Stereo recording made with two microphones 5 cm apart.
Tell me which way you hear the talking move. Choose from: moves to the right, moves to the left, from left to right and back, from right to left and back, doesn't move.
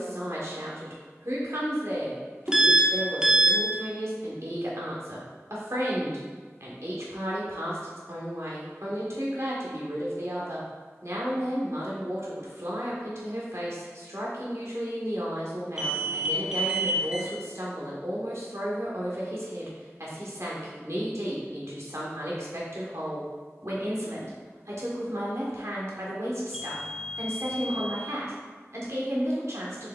doesn't move.